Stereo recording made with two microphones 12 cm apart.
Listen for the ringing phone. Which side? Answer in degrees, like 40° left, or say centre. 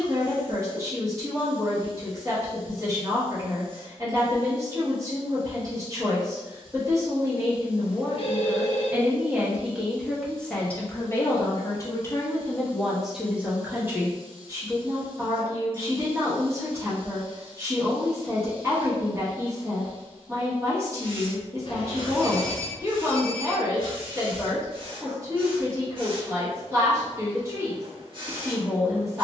50° left.